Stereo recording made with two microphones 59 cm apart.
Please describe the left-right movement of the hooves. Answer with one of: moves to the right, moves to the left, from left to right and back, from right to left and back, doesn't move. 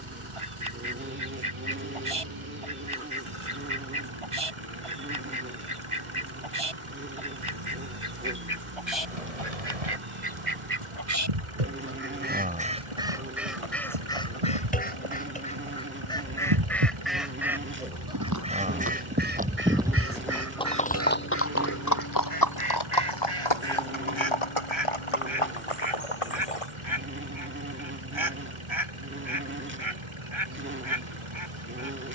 moves to the left.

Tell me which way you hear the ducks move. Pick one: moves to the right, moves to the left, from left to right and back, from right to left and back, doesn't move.
from right to left and back.